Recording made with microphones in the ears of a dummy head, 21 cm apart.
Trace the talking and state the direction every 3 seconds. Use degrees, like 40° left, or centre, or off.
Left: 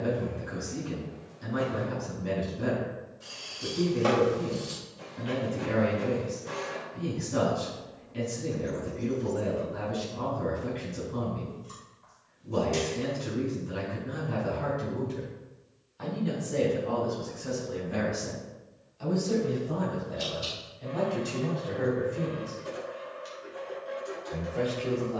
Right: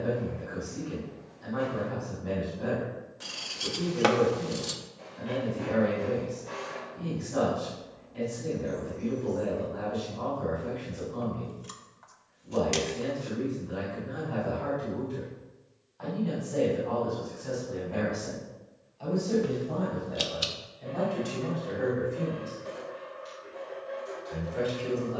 40° left, 40° left, 40° left, 40° left, 40° left, 30° left, 10° left, centre, 10° right.